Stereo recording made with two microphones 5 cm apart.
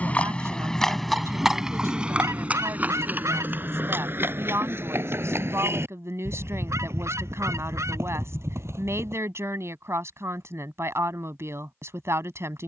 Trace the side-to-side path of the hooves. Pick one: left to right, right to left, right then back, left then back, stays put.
left to right.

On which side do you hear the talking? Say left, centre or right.
right.